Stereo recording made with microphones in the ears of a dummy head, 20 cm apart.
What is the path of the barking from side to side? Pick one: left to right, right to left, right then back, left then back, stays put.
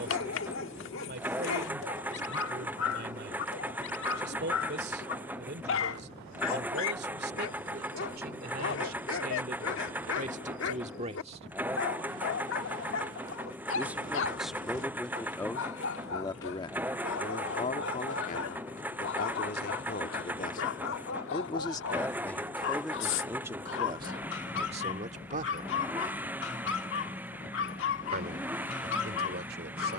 stays put.